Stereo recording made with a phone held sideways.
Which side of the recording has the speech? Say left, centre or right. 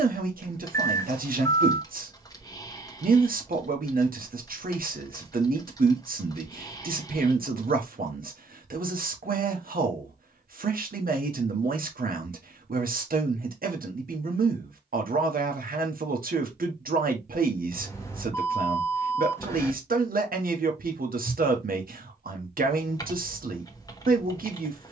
right.